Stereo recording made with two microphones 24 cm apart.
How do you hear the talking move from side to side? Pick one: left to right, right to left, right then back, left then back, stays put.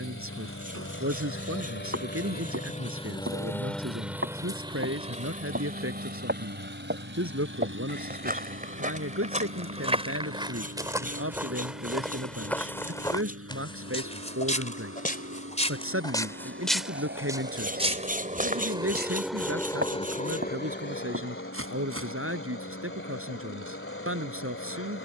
stays put.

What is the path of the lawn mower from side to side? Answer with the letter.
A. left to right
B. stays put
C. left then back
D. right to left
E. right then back
E.